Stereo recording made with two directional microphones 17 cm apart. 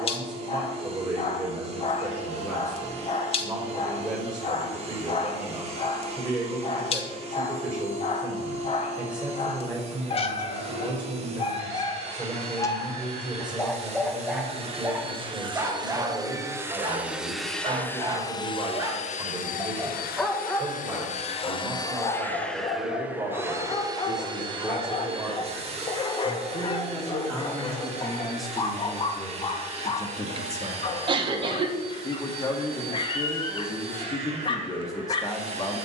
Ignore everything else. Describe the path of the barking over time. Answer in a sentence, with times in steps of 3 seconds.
In this clip you hear the barking on the left from 0 s, in the centre from 12 s, on the right from 15 s, in the centre from 18 s and on the left from 21 s.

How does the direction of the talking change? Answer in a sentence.
In this clip you hear the talking move from right to left.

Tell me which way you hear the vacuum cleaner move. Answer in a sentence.
You can hear the vacuum cleaner go left and come back.